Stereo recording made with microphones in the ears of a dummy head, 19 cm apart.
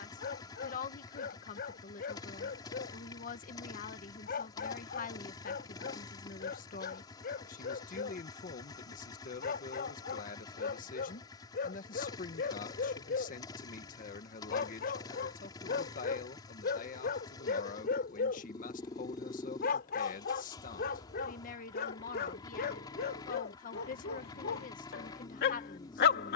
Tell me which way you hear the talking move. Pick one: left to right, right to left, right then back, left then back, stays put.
stays put.